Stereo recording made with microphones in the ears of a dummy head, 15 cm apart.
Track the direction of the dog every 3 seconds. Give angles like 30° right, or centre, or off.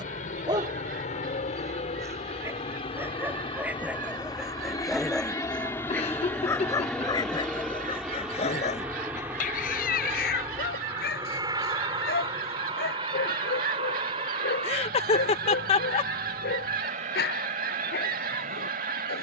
20° right, centre, 30° left, 60° left, 70° left, 70° left, 70° left.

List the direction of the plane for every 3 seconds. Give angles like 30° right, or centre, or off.
50° left, 30° left, centre, 20° right, 30° right, 40° right, 50° right.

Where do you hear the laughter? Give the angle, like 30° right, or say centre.
40° left.